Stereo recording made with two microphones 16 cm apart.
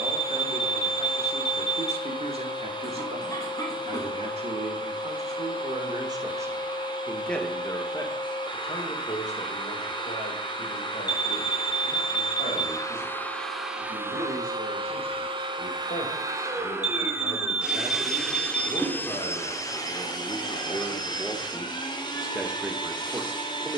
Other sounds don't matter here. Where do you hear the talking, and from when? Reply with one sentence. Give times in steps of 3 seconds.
In this clip you hear the talking on the right from 0 s, in the centre from 6 s, on the left from 9 s and in the centre from 21 s.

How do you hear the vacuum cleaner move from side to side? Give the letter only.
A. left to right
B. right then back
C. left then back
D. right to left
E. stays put
B.